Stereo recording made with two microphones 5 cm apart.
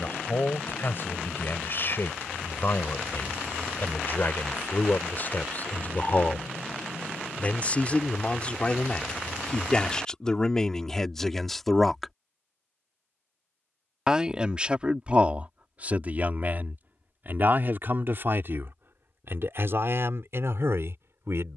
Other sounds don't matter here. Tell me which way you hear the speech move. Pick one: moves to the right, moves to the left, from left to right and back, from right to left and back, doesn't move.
moves to the right.